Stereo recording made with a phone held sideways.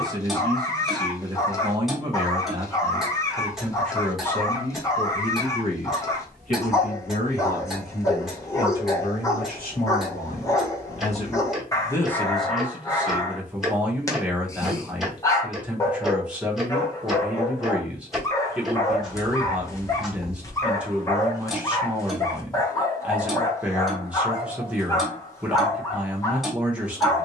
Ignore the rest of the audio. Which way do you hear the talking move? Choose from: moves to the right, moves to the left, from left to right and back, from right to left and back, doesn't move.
from right to left and back.